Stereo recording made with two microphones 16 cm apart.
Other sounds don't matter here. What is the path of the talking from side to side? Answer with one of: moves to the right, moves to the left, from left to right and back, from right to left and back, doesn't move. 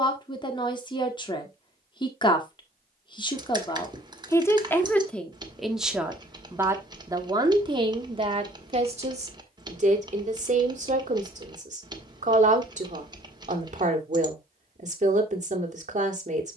moves to the right.